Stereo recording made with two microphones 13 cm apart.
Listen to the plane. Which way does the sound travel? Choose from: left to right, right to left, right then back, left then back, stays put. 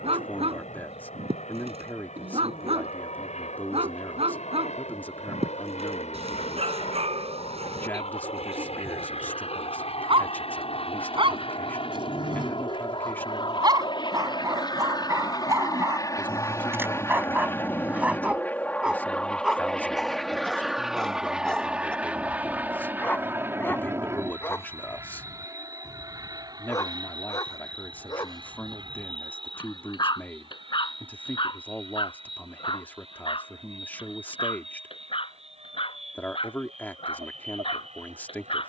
left to right.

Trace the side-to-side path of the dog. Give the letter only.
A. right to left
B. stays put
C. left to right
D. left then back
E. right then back
A.